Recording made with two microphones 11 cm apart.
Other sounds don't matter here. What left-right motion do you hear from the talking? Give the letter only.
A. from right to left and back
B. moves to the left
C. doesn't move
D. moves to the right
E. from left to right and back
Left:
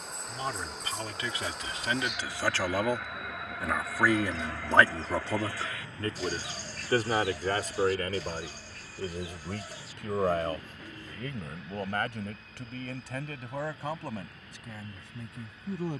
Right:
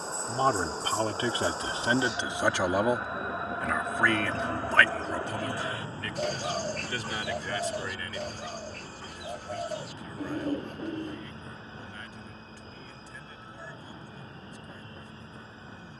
B.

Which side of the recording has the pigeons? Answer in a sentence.
In this clip you hear the pigeons on the right.